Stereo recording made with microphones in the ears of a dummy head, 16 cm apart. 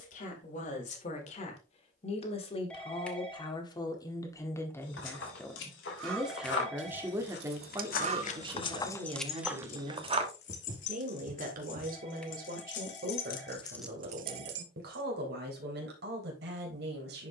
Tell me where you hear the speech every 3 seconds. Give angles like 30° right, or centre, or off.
40° left, 20° left, 20° right, 40° right, 60° right, 70° right.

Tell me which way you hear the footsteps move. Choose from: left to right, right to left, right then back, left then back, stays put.
left to right.